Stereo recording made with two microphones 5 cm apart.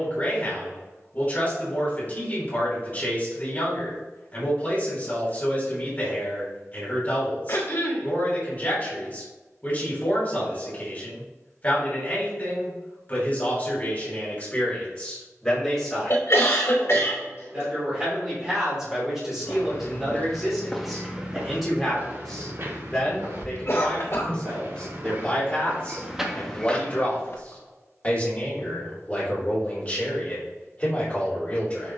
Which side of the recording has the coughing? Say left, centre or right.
left.